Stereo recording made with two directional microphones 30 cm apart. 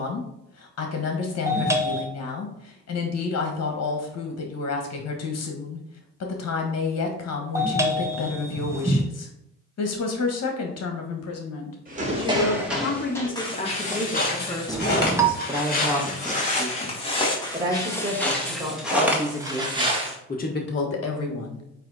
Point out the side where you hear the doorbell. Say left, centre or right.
centre.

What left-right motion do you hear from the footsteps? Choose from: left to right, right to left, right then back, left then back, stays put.
left then back.